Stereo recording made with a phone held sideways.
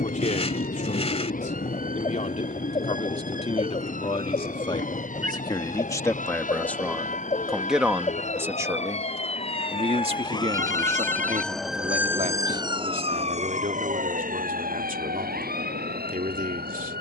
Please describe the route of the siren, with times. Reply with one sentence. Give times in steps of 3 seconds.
You can hear the siren on the left from 0 s and on the right from 12 s.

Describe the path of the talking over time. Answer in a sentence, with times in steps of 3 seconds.
In this clip you hear the talking on the left from 0 s, in the centre from 6 s and on the right from 9 s.